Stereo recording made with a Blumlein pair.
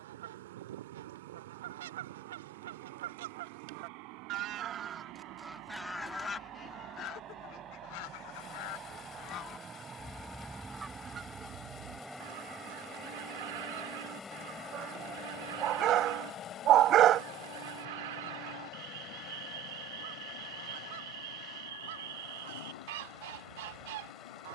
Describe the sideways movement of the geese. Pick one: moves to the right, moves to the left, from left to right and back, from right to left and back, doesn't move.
from right to left and back.